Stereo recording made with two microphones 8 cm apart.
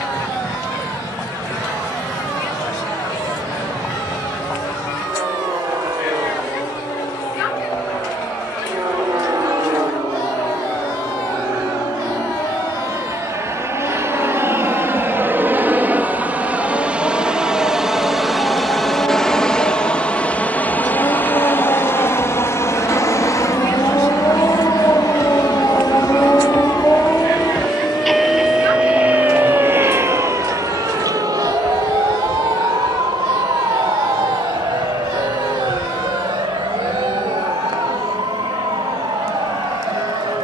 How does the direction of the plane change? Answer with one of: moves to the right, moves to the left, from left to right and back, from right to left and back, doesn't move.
moves to the left.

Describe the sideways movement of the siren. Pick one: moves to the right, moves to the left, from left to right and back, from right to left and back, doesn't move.
moves to the right.